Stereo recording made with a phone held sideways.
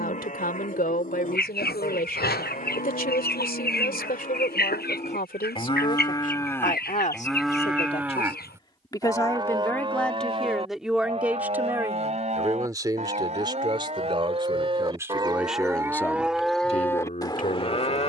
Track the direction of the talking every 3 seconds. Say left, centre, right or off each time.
left, left, left, centre, right, left.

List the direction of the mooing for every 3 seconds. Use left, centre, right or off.
left, left, centre, right, right, centre.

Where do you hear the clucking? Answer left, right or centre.
left.